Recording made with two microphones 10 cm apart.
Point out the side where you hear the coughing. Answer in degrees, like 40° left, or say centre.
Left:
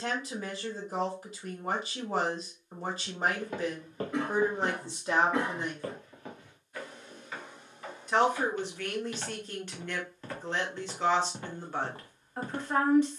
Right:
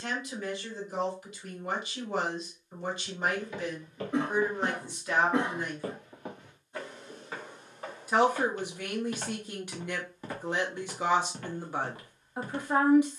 20° right.